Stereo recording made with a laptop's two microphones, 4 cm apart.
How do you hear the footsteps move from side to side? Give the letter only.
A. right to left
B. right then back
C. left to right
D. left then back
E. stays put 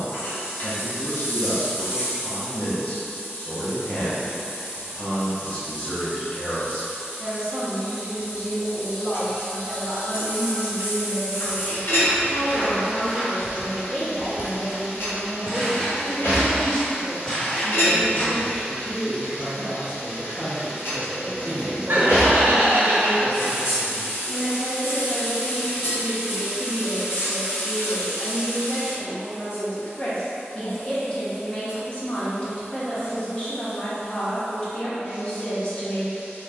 B.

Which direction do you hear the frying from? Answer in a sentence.
In this clip you hear the frying on the left.